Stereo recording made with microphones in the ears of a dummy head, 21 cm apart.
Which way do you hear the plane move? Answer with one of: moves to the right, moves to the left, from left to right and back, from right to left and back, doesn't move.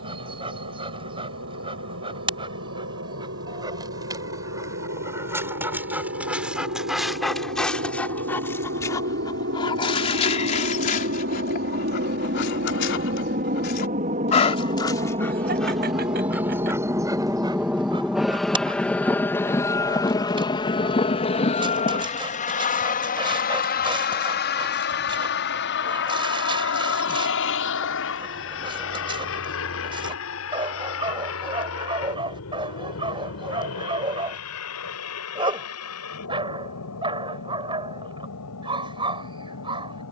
moves to the left.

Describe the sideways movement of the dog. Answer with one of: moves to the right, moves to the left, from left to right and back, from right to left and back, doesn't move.
from right to left and back.